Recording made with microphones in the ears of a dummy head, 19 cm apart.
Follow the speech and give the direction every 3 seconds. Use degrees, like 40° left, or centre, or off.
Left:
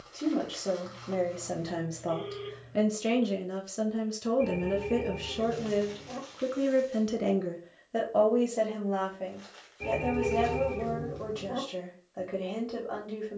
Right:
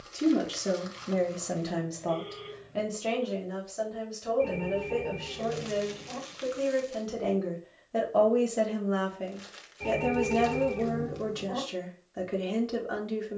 10° right, 50° left, 20° left, 30° right, 30° right.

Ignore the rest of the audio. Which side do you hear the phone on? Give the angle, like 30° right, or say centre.
20° left.